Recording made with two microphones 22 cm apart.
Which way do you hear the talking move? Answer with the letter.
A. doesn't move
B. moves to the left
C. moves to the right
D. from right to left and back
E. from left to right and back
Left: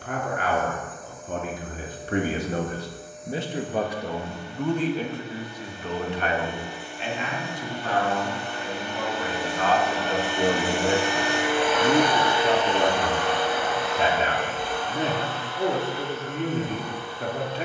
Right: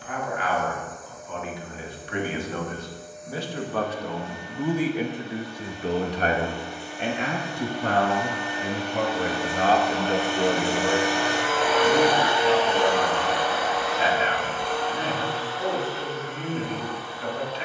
E.